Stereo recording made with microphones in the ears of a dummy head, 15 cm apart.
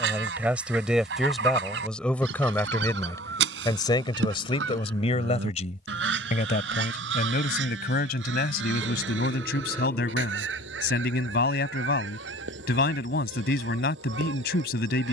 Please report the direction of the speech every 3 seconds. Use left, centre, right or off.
centre, left, left, left, left.